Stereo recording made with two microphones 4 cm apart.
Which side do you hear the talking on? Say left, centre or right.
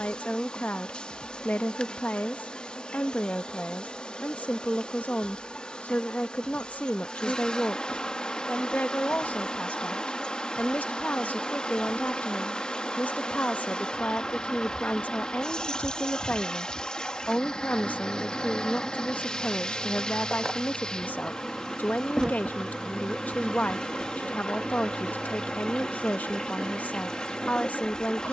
left.